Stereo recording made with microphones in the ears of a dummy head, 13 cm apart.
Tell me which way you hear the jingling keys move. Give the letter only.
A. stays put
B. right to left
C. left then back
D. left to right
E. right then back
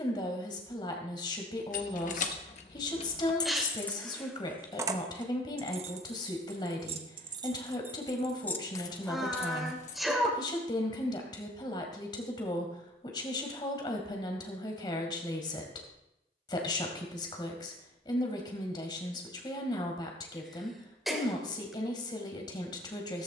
E.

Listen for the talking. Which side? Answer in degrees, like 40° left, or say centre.
30° left.